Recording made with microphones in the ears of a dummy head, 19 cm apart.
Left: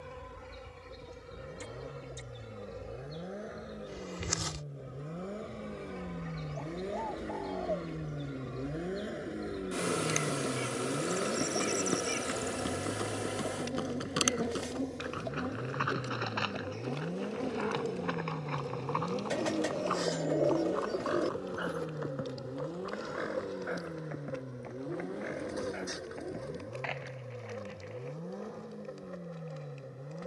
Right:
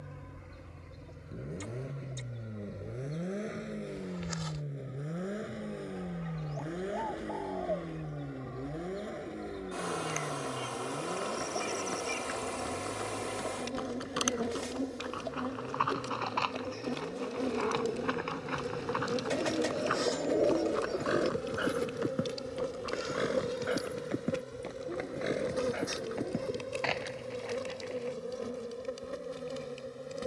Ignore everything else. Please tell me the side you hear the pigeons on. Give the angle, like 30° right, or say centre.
centre.